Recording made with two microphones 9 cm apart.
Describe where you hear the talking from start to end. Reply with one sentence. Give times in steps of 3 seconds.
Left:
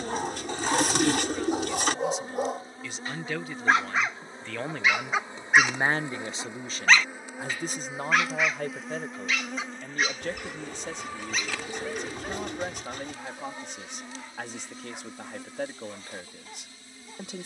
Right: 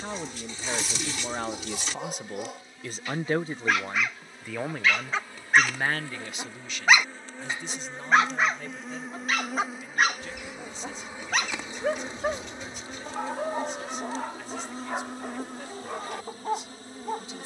In this clip you hear the talking on the right from 0 s, in the centre from 3 s and on the left from 6 s.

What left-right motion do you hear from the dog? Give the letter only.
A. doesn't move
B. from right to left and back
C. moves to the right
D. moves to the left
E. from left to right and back
C.